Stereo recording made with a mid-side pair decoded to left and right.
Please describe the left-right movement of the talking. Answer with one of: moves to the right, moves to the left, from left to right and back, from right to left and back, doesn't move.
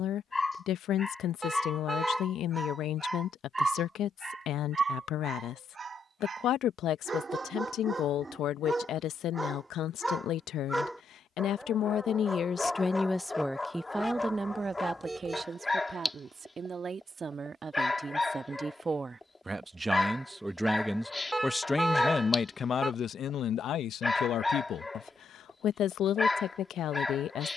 from left to right and back.